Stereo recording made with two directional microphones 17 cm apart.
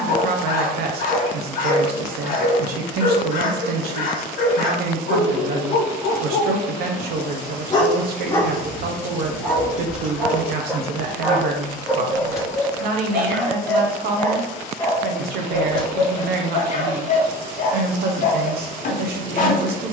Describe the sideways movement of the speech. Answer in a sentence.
In this clip you hear the speech stay put.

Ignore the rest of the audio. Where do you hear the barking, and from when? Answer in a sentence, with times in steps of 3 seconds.
In this clip you hear the barking on the left from 0 s, in the centre from 9 s and on the left from 15 s.